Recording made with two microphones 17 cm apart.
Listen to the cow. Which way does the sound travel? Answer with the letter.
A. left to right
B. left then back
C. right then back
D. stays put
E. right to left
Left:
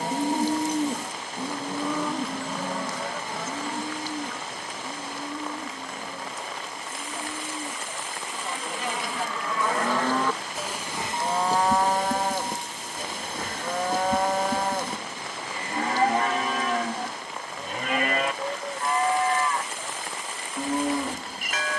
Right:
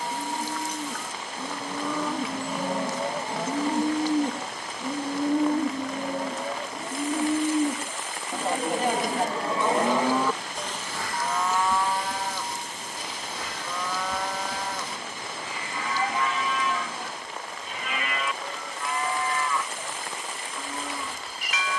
C.